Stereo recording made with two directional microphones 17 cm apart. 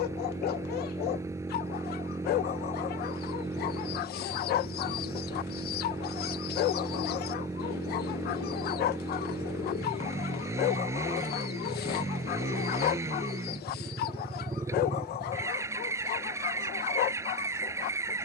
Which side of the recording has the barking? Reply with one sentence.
You can hear the barking on the left.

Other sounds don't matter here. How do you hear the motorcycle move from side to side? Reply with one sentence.
In this clip you hear the motorcycle stay in one place.